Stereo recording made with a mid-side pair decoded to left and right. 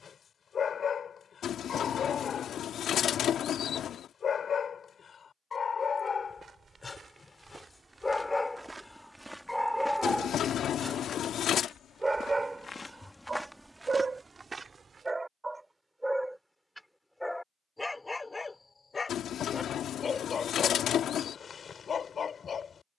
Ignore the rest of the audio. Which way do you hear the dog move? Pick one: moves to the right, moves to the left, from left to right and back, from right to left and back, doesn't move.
from left to right and back.